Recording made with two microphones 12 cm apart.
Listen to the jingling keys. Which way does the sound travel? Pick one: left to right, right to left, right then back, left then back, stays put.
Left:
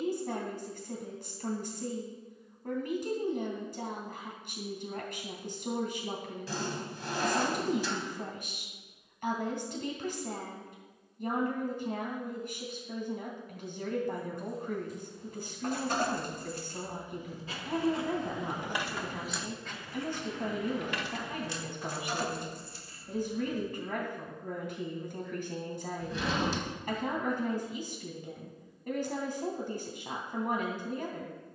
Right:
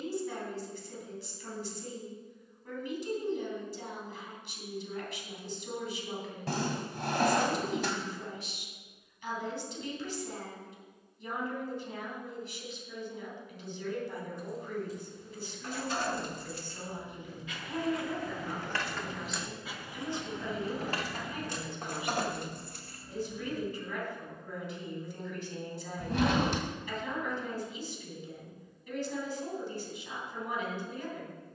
left to right.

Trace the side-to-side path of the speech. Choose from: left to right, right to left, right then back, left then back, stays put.
stays put.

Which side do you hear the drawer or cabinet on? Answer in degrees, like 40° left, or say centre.
60° right.